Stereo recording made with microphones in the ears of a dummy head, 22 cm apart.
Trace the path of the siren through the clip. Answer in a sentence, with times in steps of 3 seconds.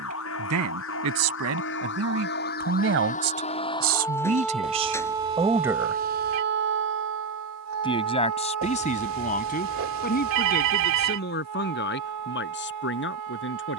You can hear the siren on the left from 0 s, in the centre from 3 s and on the right from 6 s.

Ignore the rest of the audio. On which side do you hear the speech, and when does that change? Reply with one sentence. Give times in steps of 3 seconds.
You can hear the speech on the right from 0 s and on the left from 6 s.